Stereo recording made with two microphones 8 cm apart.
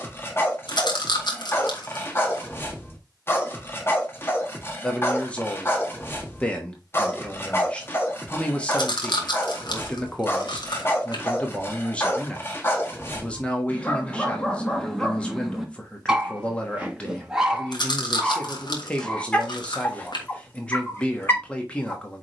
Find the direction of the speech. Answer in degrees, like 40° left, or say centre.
20° left.